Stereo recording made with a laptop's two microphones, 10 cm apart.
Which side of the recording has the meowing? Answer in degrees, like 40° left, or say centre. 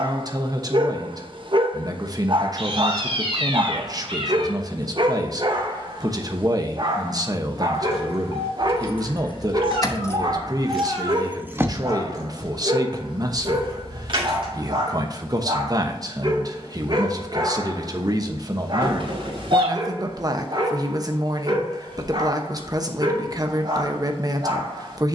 60° right.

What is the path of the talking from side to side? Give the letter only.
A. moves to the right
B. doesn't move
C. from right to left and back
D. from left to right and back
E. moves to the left
B.